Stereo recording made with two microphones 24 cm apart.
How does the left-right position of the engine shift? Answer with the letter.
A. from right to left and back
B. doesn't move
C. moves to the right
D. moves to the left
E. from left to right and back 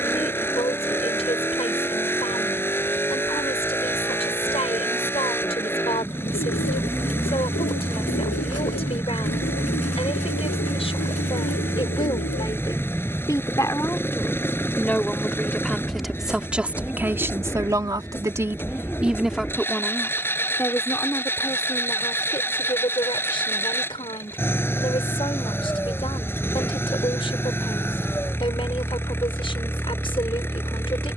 B.